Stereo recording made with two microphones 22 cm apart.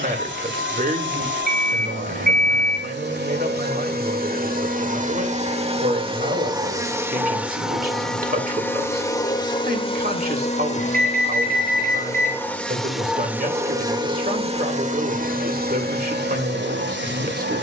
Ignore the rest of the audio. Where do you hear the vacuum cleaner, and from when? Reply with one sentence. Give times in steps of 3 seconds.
In this clip you hear the vacuum cleaner on the right from 0 s, in the centre from 6 s, on the left from 9 s, in the centre from 12 s and on the right from 15 s.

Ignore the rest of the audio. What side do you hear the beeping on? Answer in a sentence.
You can hear the beeping on the right.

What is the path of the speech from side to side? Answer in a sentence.
In this clip you hear the speech stay put.